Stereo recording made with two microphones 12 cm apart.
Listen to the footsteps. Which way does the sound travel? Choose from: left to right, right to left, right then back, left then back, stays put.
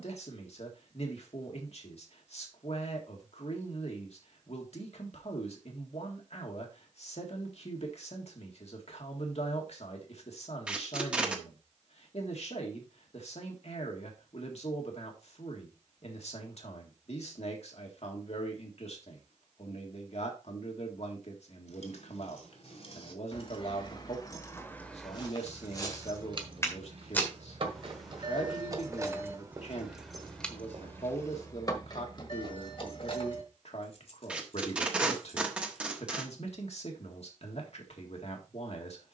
left to right.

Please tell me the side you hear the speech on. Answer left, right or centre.
left.